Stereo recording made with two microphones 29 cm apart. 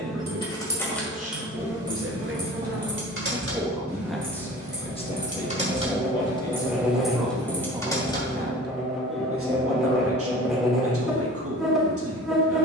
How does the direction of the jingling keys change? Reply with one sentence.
You can hear the jingling keys go right and come back.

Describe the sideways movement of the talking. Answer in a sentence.
In this clip you hear the talking move from right to left and back again.